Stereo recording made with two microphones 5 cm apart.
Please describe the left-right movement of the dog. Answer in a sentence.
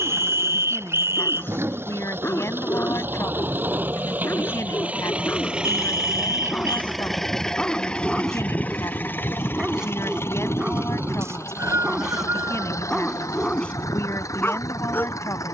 In this clip you hear the dog go right and come back.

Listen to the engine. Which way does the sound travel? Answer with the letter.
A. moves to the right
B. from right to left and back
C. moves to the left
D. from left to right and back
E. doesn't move
C.